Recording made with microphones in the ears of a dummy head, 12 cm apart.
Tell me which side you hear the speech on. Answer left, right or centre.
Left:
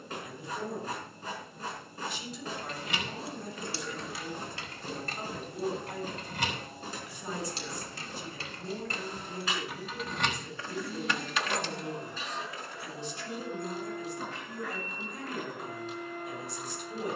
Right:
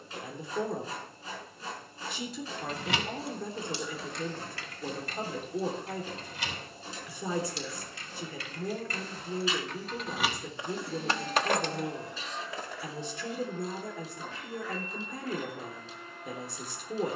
right.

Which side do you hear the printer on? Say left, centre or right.
left.